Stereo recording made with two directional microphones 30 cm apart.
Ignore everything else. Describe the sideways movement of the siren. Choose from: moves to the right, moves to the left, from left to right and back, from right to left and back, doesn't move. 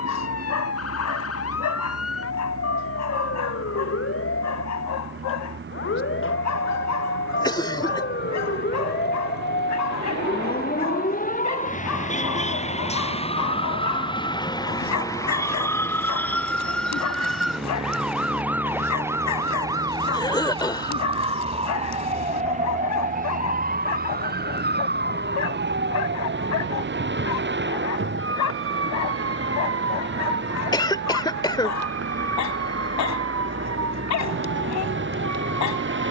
moves to the right.